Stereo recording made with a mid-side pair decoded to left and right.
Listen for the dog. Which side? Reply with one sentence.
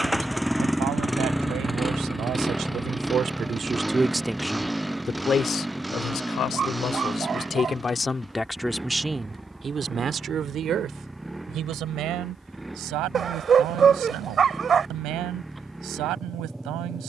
In this clip you hear the dog on the right.